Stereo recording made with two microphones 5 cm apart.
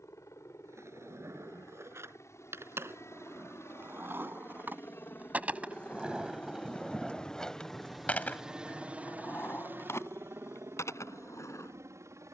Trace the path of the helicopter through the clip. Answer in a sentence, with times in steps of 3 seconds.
In this clip you hear the helicopter on the left from 0 s, in the centre from 6 s and on the right from 9 s.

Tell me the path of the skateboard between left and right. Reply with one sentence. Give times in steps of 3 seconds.
In this clip you hear the skateboard on the right from 0 s, in the centre from 6 s and on the left from 9 s.